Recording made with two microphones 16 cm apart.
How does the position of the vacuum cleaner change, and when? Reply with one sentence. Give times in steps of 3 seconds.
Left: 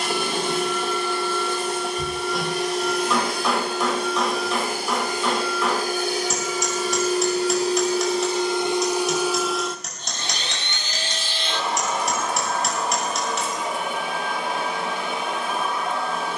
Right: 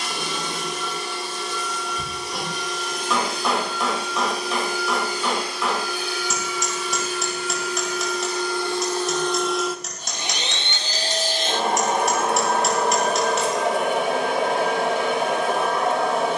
You can hear the vacuum cleaner on the left from 0 s and on the right from 9 s.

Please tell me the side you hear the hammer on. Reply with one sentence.
You can hear the hammer in the centre.